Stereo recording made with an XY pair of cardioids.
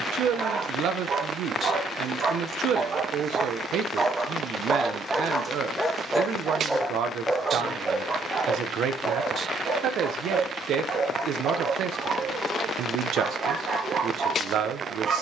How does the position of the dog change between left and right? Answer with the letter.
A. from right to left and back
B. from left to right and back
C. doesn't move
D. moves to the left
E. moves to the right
A.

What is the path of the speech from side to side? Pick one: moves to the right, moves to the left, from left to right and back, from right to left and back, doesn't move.
doesn't move.